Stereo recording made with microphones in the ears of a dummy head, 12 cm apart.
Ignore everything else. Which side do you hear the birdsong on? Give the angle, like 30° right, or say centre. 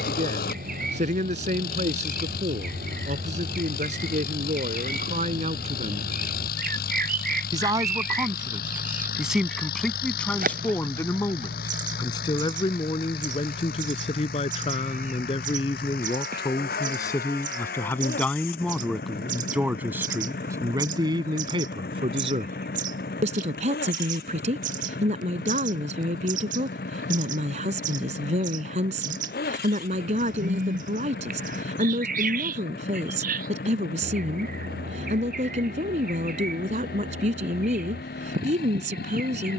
60° right.